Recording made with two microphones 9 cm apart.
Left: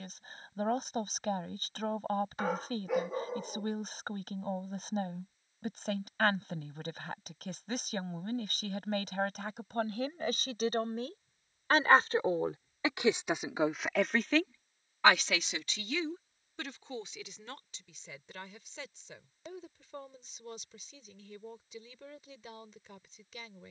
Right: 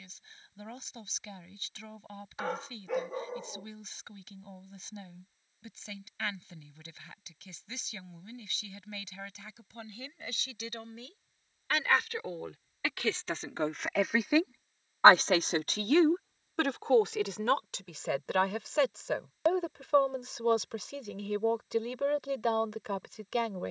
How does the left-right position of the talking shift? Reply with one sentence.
You can hear the talking travel towards the right.